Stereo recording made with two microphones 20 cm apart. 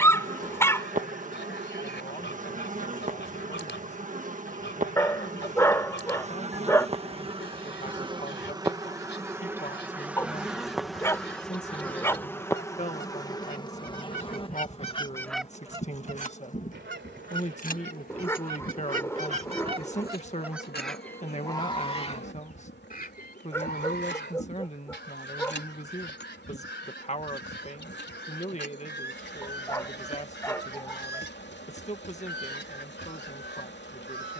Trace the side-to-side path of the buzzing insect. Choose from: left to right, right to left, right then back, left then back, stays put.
right to left.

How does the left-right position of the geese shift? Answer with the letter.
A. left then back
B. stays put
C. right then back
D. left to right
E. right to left
C.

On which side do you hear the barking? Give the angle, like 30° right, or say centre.
10° left.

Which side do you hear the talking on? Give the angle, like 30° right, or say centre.
30° left.